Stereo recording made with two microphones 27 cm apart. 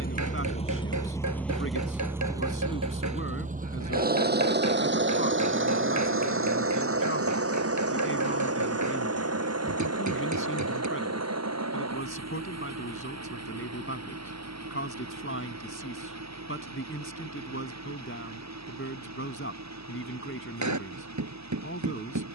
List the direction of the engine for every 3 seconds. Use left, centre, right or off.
centre, right, right, right, right, right, right, right.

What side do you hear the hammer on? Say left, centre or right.
right.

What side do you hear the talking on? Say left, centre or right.
left.